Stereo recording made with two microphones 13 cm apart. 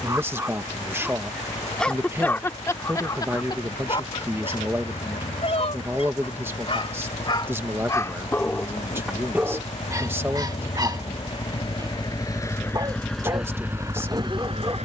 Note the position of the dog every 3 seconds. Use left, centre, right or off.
centre, left, left, right, right.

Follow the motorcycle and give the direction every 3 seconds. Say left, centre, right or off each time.
left, left, left, left, centre.